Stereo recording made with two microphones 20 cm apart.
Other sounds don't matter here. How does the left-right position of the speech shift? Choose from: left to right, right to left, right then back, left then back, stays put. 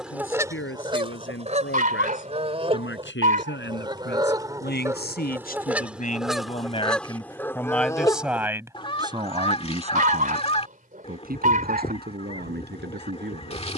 left to right.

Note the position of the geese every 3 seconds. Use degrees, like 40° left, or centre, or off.
30° right, 20° right, 10° left, 30° left, 30° left.